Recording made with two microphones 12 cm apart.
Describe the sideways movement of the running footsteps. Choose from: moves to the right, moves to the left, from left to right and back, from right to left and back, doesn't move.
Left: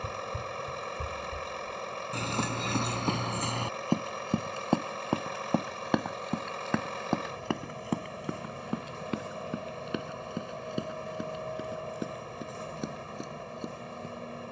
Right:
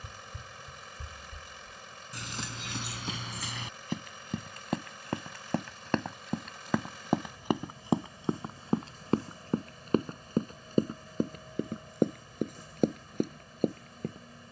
moves to the right.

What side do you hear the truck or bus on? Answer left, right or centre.
left.